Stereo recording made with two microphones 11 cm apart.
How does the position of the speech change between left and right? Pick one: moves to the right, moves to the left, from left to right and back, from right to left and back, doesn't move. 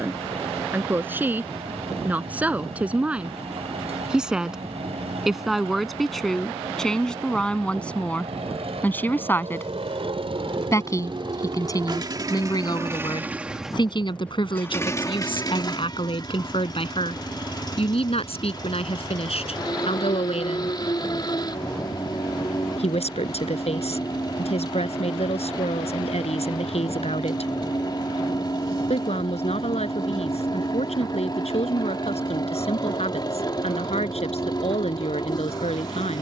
moves to the left.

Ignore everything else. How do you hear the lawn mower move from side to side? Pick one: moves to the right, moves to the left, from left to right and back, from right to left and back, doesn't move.
moves to the left.